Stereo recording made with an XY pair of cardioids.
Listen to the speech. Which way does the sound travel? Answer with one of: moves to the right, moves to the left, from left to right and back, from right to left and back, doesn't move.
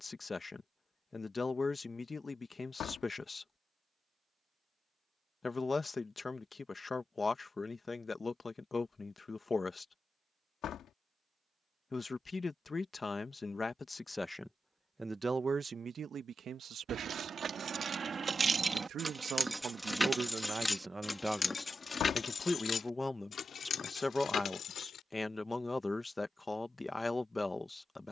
from left to right and back.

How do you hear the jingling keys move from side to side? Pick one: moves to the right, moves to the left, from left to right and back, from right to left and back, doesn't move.
moves to the left.